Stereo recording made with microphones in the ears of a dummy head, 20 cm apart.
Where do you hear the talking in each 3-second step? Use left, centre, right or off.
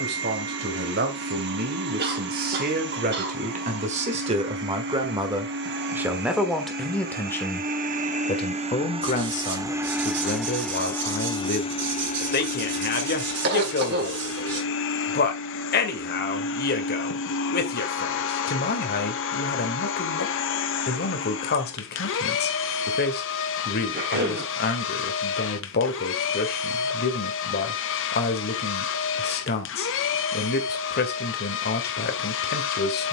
right, right, centre, left, left, left, left, left, left, left, left.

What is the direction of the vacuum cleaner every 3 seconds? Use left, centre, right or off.
right, right, right, centre, left, left, left, left, left, left, left.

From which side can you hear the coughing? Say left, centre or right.
right.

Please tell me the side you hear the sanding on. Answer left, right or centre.
right.